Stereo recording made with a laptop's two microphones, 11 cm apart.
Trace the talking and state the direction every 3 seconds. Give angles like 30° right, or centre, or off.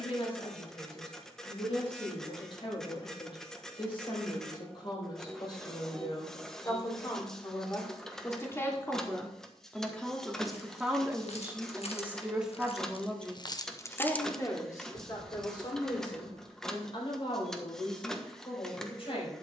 50° left, 40° left, 30° left, centre, 10° left, 40° left, 50° left.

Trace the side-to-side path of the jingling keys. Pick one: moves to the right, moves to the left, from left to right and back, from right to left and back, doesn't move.
moves to the right.